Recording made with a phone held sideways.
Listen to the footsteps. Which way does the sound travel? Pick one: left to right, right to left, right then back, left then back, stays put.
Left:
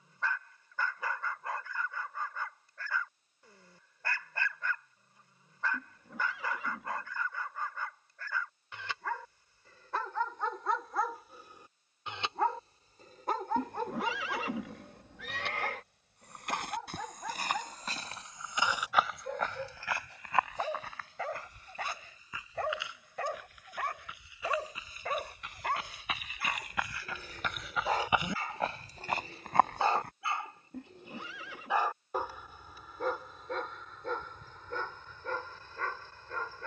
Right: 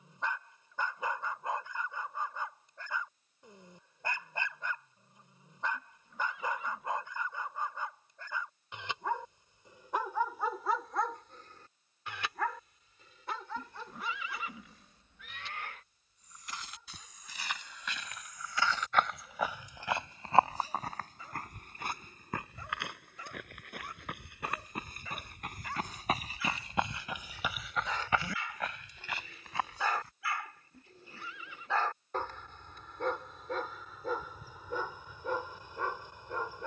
right then back.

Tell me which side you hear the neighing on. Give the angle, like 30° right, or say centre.
80° left.